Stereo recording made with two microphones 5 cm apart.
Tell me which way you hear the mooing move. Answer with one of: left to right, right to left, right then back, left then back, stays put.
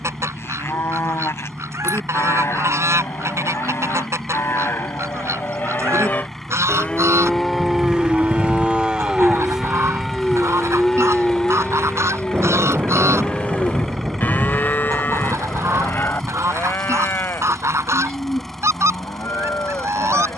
right then back.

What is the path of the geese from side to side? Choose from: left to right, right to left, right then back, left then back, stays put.
stays put.